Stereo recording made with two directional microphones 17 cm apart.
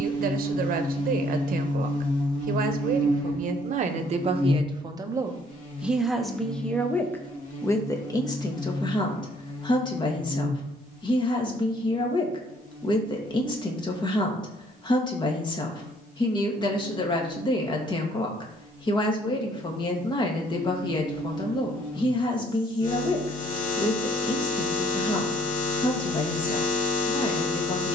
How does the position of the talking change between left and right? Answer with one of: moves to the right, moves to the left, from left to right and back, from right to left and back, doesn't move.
moves to the left.